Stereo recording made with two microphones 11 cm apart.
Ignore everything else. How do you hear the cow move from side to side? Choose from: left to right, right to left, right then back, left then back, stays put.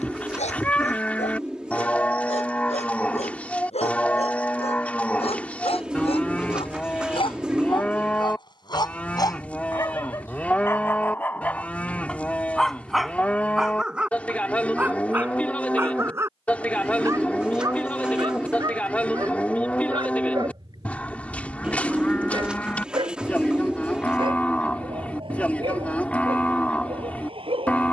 stays put.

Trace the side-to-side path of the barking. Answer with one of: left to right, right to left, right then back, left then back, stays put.
left to right.